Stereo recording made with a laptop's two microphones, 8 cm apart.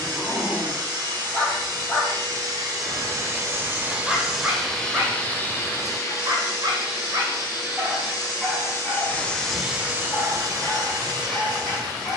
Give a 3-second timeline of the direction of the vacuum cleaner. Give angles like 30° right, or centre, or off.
50° right, centre, 50° left, 30° right.